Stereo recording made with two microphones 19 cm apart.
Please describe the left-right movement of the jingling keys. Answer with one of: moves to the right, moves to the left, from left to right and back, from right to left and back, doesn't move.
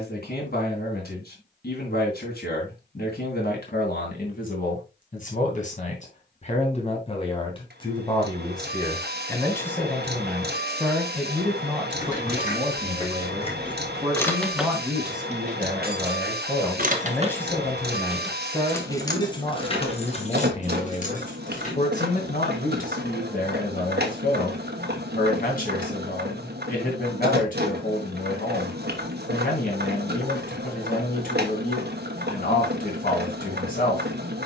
from left to right and back.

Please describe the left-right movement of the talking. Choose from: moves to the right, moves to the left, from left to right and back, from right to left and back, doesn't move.
from left to right and back.